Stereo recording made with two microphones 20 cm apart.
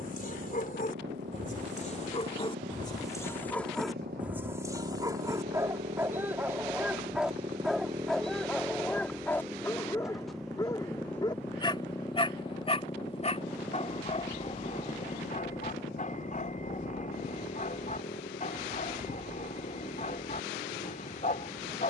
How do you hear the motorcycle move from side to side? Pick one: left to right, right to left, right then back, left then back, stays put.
right to left.